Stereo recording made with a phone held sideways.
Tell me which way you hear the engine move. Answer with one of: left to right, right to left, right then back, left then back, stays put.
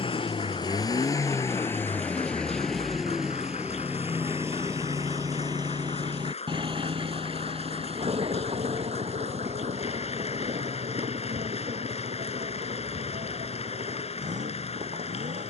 left to right.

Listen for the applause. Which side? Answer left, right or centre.
left.